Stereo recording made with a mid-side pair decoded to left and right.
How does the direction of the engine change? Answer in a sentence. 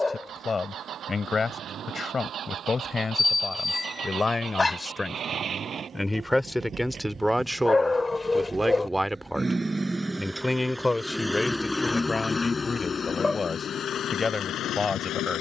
You can hear the engine go from the right side to the left.